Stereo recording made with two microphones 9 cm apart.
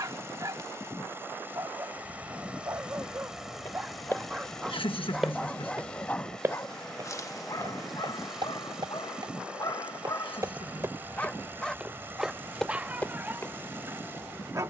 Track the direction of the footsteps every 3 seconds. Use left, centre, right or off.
off, centre, right, right, centre.